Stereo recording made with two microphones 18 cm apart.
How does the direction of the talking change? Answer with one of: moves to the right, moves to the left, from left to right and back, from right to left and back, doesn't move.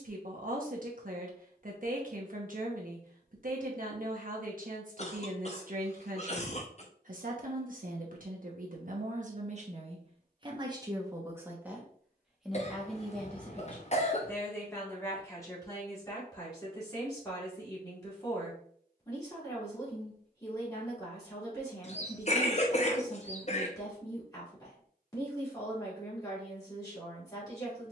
moves to the left.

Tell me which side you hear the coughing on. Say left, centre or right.
left.